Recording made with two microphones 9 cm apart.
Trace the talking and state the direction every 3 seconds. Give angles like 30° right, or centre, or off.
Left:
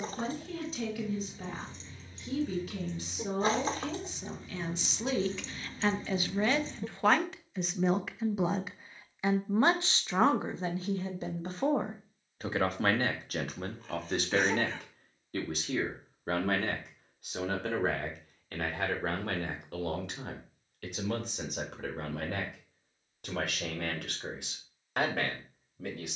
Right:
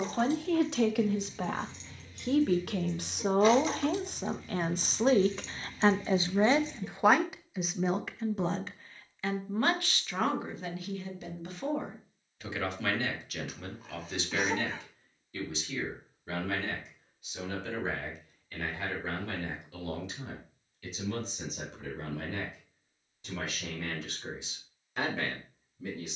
70° right, 50° right, 10° right, 30° left, 40° left, 50° left, 60° left, 60° left, 60° left.